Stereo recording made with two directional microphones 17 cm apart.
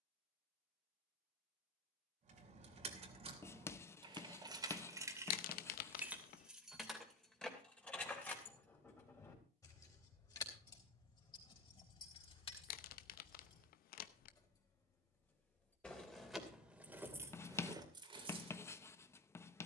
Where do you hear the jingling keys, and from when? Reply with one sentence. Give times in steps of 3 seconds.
You can hear the jingling keys on the right from 0 s, in the centre from 6 s, on the left from 9 s, in the centre from 15 s and on the right from 18 s.